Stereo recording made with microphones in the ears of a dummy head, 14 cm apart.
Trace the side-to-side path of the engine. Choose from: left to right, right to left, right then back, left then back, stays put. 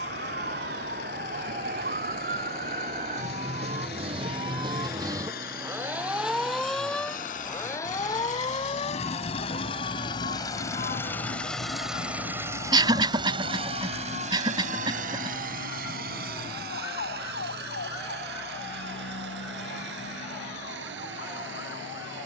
left to right.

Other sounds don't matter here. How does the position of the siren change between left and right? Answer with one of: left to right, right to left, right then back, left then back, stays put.
right to left.